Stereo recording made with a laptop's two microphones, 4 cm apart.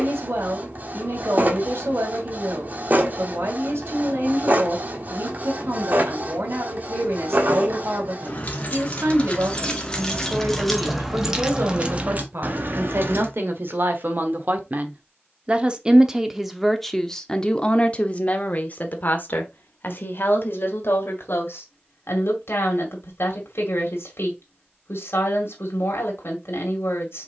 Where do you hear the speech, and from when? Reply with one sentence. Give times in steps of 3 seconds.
In this clip you hear the speech on the right from 0 s, in the centre from 15 s and on the left from 18 s.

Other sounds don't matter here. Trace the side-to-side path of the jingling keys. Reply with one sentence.
In this clip you hear the jingling keys move to the right.